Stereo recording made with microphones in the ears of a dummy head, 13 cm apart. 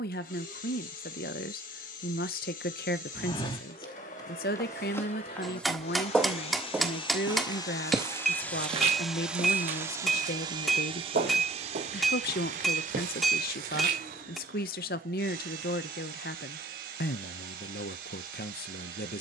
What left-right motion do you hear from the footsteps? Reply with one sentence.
In this clip you hear the footsteps move from left to right.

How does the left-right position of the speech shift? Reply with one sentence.
You can hear the speech stay put.